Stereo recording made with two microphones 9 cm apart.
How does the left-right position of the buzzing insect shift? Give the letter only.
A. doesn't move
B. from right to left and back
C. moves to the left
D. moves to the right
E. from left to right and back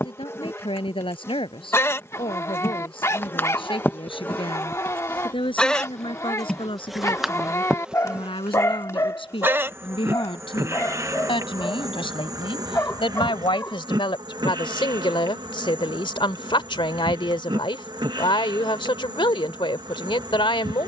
D.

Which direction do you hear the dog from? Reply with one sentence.
In this clip you hear the dog on the left.